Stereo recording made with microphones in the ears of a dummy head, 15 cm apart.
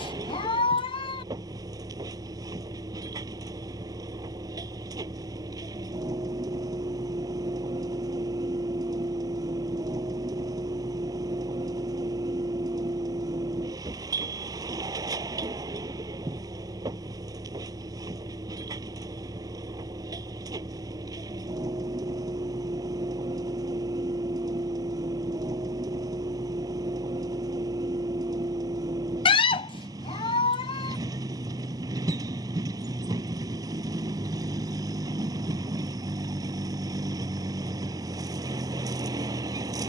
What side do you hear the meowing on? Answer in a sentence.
In this clip you hear the meowing on the left.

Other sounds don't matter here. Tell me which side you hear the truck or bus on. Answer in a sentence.
In this clip you hear the truck or bus on the right.